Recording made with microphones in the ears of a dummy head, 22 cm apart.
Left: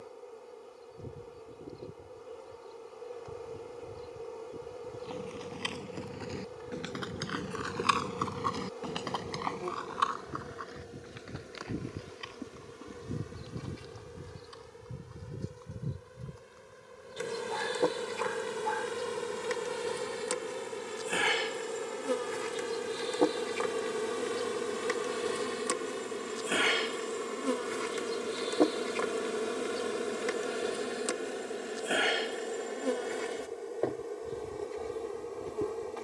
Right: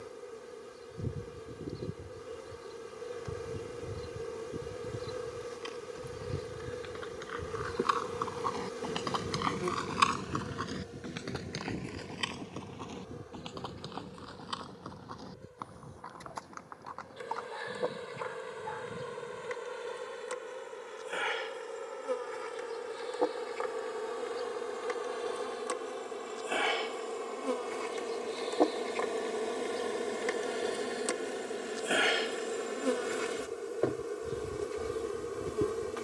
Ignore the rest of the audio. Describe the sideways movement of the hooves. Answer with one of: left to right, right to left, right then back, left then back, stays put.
left to right.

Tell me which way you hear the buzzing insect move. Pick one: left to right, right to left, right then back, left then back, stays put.
left then back.